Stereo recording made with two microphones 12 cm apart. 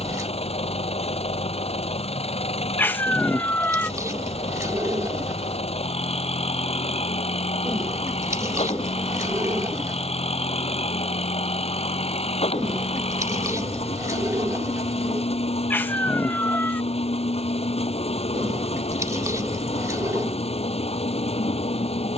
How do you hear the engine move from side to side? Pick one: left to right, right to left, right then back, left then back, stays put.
stays put.